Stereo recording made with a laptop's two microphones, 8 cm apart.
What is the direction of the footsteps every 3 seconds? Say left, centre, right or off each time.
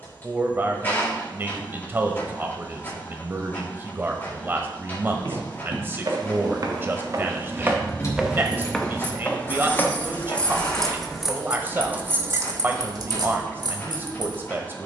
off, right, right, left, off.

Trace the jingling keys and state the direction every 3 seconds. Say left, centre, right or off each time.
off, off, left, centre, right.